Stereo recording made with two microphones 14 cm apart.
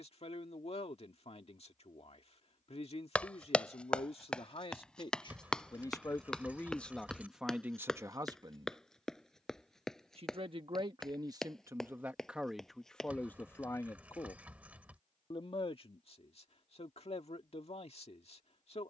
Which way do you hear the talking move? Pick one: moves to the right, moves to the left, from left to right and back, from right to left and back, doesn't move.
from left to right and back.